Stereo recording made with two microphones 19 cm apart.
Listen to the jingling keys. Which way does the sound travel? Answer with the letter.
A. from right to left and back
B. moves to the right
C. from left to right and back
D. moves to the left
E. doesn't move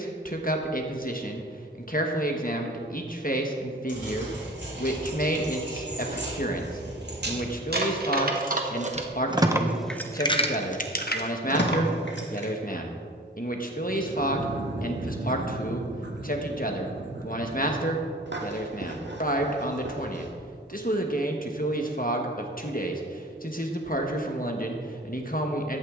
D.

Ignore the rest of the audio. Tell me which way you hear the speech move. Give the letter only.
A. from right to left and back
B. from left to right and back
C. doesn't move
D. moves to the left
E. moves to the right
C.